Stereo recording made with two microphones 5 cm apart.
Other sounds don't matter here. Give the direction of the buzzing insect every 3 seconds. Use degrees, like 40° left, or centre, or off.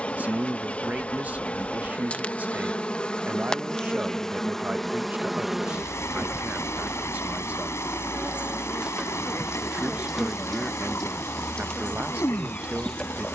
30° left, 10° left, 20° right, 10° left, 20° left.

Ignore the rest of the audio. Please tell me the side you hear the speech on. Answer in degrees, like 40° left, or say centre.
30° right.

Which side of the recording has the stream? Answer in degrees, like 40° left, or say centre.
60° left.